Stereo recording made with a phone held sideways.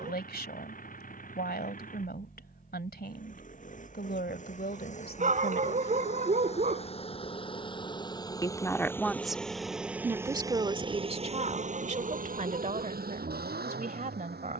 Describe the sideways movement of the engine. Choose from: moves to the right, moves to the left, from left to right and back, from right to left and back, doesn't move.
moves to the right.